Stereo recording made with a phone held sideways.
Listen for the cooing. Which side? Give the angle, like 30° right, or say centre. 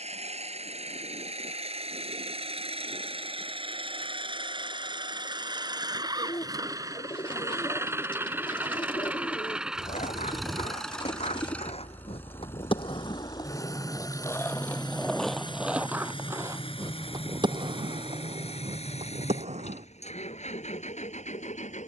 40° left.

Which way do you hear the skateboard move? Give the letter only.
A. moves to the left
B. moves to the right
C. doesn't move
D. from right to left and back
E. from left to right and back
B.